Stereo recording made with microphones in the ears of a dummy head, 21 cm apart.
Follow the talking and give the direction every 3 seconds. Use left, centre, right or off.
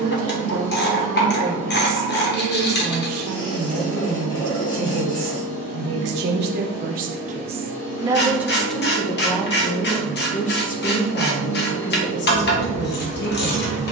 right, right, right, left, left.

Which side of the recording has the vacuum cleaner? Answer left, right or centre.
left.